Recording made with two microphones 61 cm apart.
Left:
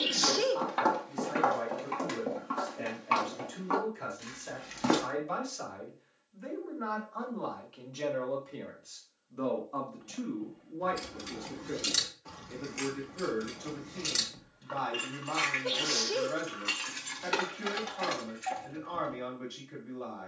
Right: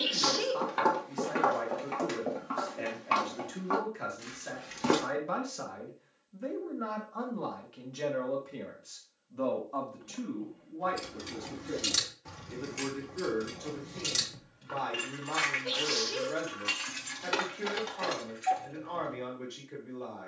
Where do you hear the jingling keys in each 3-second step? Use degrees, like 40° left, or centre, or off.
off, off, off, centre, 60° right, 20° right, 20° left.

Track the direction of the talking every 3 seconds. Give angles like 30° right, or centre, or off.
80° right, 80° right, 50° right, 10° right, 10° left, 10° left, 10° left.